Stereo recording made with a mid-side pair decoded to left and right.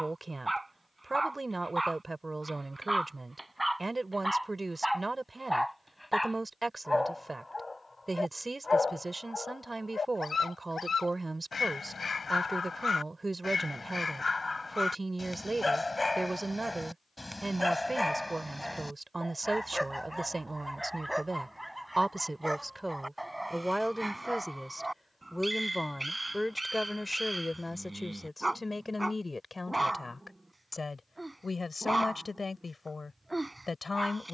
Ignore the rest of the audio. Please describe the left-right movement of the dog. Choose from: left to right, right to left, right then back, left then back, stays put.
left then back.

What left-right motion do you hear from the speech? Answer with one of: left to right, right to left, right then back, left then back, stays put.
right to left.